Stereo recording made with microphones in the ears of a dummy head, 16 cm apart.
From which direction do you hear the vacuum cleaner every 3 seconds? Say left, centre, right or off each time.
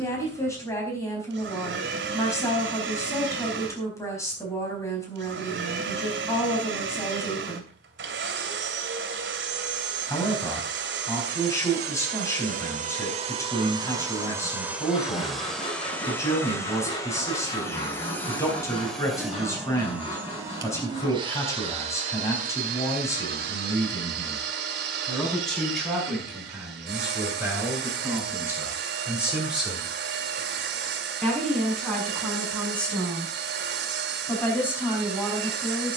right, right, right, right, right, centre, centre, right, right, right, right, right.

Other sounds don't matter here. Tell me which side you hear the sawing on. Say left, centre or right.
left.